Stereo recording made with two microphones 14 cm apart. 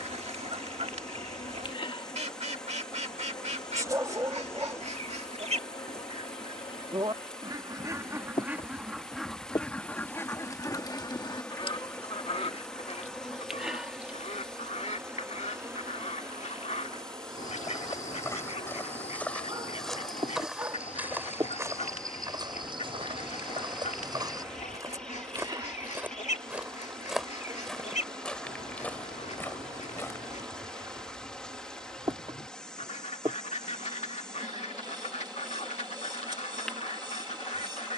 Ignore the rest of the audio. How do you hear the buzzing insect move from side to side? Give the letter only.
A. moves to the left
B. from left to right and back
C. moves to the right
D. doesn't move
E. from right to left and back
C.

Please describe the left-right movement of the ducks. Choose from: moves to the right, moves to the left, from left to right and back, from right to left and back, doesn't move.
moves to the left.